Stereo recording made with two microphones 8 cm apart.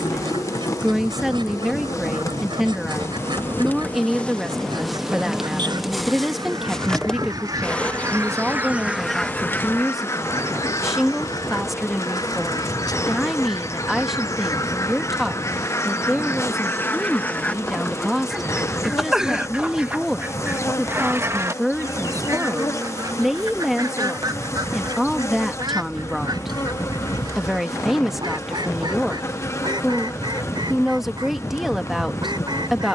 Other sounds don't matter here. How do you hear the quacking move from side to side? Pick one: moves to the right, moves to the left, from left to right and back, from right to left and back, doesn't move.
from right to left and back.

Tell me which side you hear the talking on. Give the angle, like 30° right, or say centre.
centre.